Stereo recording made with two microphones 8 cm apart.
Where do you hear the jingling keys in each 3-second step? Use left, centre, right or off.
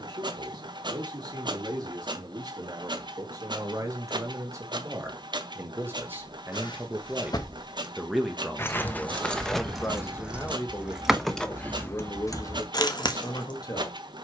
off, off, left, centre, left.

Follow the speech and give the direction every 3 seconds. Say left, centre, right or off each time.
right, right, centre, left, left.